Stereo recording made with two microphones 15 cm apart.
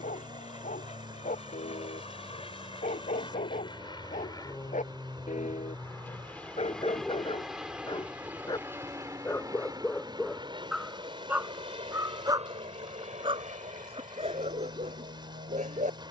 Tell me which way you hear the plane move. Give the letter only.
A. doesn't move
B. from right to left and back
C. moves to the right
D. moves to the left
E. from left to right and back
C.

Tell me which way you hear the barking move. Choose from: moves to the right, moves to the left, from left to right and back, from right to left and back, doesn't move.
moves to the right.